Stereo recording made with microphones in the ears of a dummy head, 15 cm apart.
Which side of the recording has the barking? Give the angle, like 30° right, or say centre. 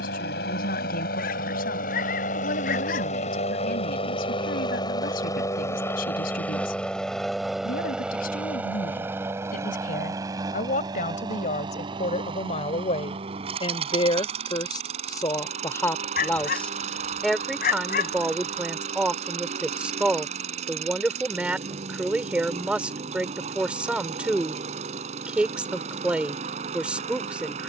60° left.